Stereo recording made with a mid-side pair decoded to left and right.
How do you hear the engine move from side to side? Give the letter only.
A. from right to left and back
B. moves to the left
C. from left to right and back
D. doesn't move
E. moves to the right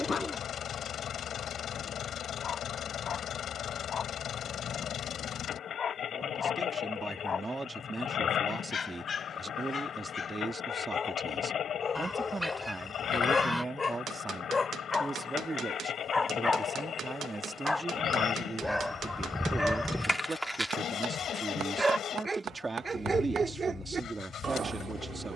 D.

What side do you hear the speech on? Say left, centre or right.
right.